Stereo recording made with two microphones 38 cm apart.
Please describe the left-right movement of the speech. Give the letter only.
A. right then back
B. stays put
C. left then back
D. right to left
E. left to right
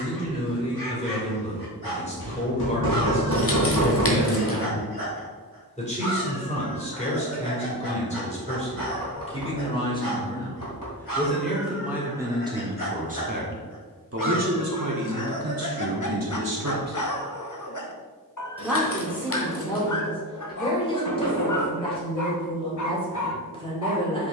A.